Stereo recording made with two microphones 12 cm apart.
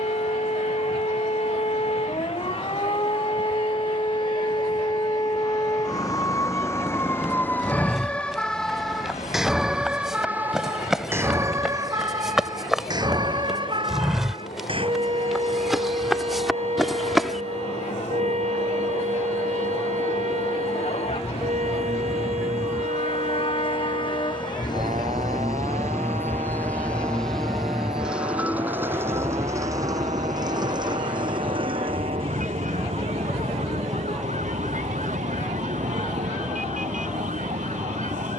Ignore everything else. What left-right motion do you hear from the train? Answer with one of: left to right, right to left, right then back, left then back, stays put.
left to right.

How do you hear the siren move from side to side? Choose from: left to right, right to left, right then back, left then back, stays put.
left to right.